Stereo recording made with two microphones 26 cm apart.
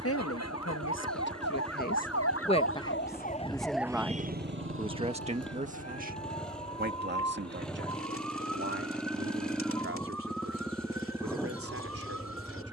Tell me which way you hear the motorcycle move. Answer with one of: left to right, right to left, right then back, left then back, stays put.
stays put.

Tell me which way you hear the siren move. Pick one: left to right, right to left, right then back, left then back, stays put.
left to right.